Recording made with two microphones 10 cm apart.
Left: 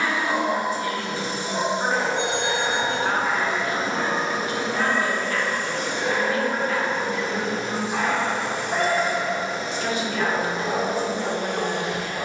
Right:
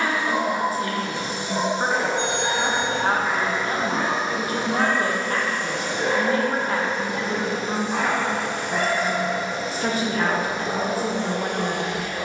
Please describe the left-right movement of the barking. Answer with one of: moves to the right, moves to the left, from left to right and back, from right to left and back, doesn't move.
from left to right and back.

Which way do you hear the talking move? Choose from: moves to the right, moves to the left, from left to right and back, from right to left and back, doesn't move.
doesn't move.